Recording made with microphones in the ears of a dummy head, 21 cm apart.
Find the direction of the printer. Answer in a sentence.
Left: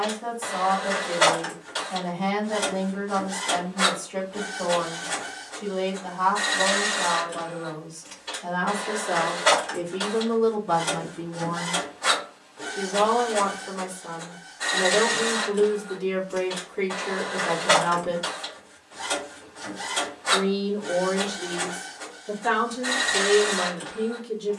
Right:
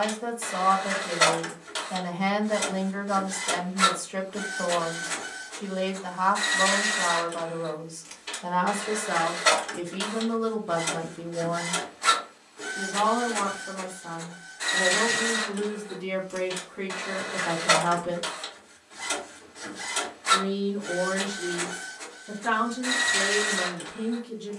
In this clip you hear the printer on the right.